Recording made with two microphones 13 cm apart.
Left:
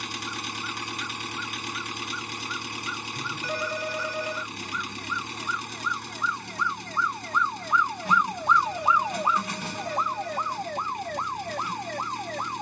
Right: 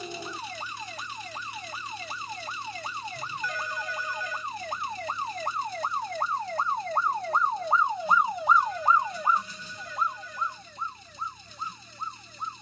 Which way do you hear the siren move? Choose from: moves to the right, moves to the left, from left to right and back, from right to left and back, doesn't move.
moves to the left.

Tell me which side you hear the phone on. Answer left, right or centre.
left.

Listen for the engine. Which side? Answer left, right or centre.
left.